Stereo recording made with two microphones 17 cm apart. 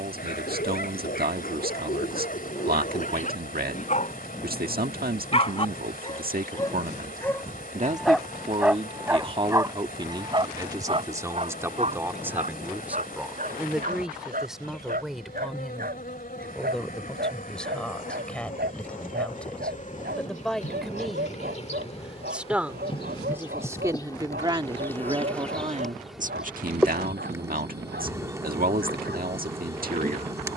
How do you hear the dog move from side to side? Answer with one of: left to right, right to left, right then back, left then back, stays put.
left to right.